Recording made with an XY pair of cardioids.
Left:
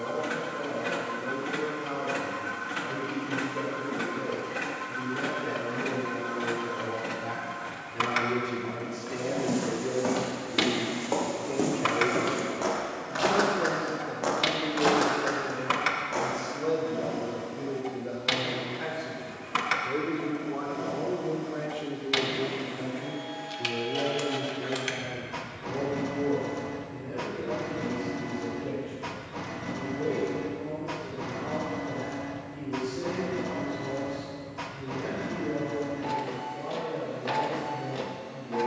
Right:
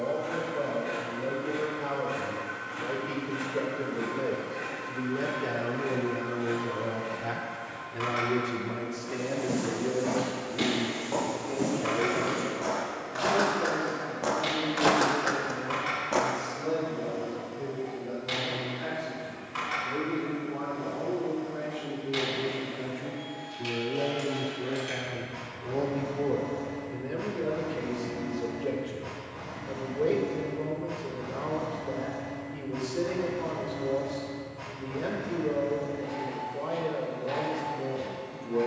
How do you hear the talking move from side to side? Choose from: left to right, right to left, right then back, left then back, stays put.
left then back.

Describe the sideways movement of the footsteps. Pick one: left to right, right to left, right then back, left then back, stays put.
left to right.